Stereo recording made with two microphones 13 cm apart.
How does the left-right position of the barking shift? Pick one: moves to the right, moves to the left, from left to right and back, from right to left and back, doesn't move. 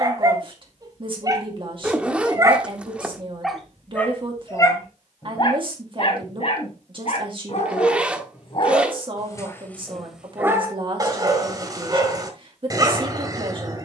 from right to left and back.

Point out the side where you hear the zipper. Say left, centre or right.
centre.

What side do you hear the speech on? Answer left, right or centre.
right.